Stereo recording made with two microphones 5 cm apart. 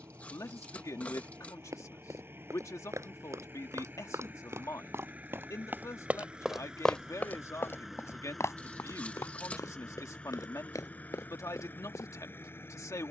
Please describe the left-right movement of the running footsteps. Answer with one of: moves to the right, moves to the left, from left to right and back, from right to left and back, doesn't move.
moves to the left.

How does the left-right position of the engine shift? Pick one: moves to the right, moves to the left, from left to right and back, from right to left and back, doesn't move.
moves to the left.